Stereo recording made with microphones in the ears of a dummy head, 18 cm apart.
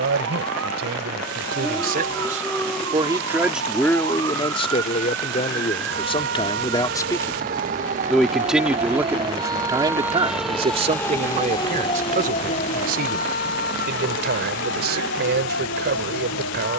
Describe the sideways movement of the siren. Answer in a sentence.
You can hear the siren move to the left.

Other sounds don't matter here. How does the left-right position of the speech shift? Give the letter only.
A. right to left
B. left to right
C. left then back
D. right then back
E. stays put
C.